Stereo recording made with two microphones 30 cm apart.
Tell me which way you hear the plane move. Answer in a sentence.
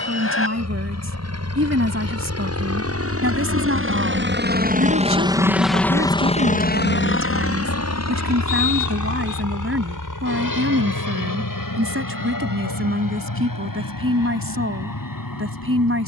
In this clip you hear the plane move to the left.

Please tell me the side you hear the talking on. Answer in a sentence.
You can hear the talking on the right.